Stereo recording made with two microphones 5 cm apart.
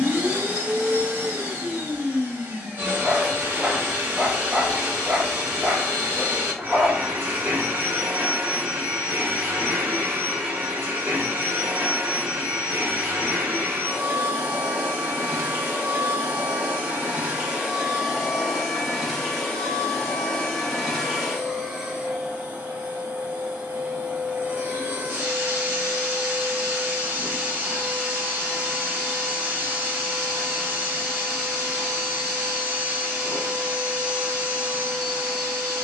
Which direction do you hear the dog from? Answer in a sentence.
You can hear the dog in the centre.